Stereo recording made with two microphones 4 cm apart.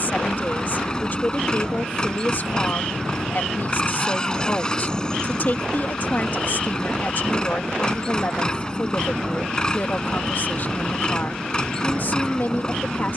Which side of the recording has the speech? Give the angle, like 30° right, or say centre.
50° left.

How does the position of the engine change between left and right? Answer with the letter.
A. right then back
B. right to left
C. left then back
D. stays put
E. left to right
D.